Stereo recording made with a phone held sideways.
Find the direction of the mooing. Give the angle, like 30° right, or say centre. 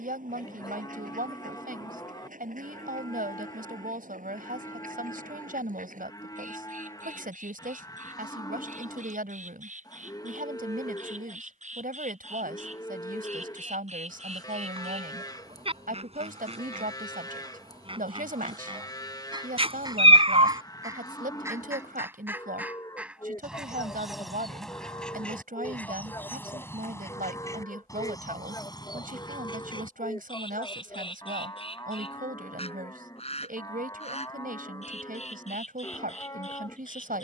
30° left.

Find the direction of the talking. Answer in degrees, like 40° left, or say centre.
80° right.